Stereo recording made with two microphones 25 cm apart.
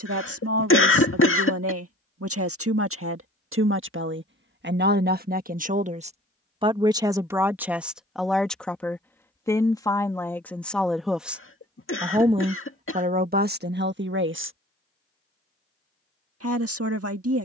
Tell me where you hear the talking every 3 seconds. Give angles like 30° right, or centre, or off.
70° right, 50° right, 10° right, 10° left, 40° right, 70° right.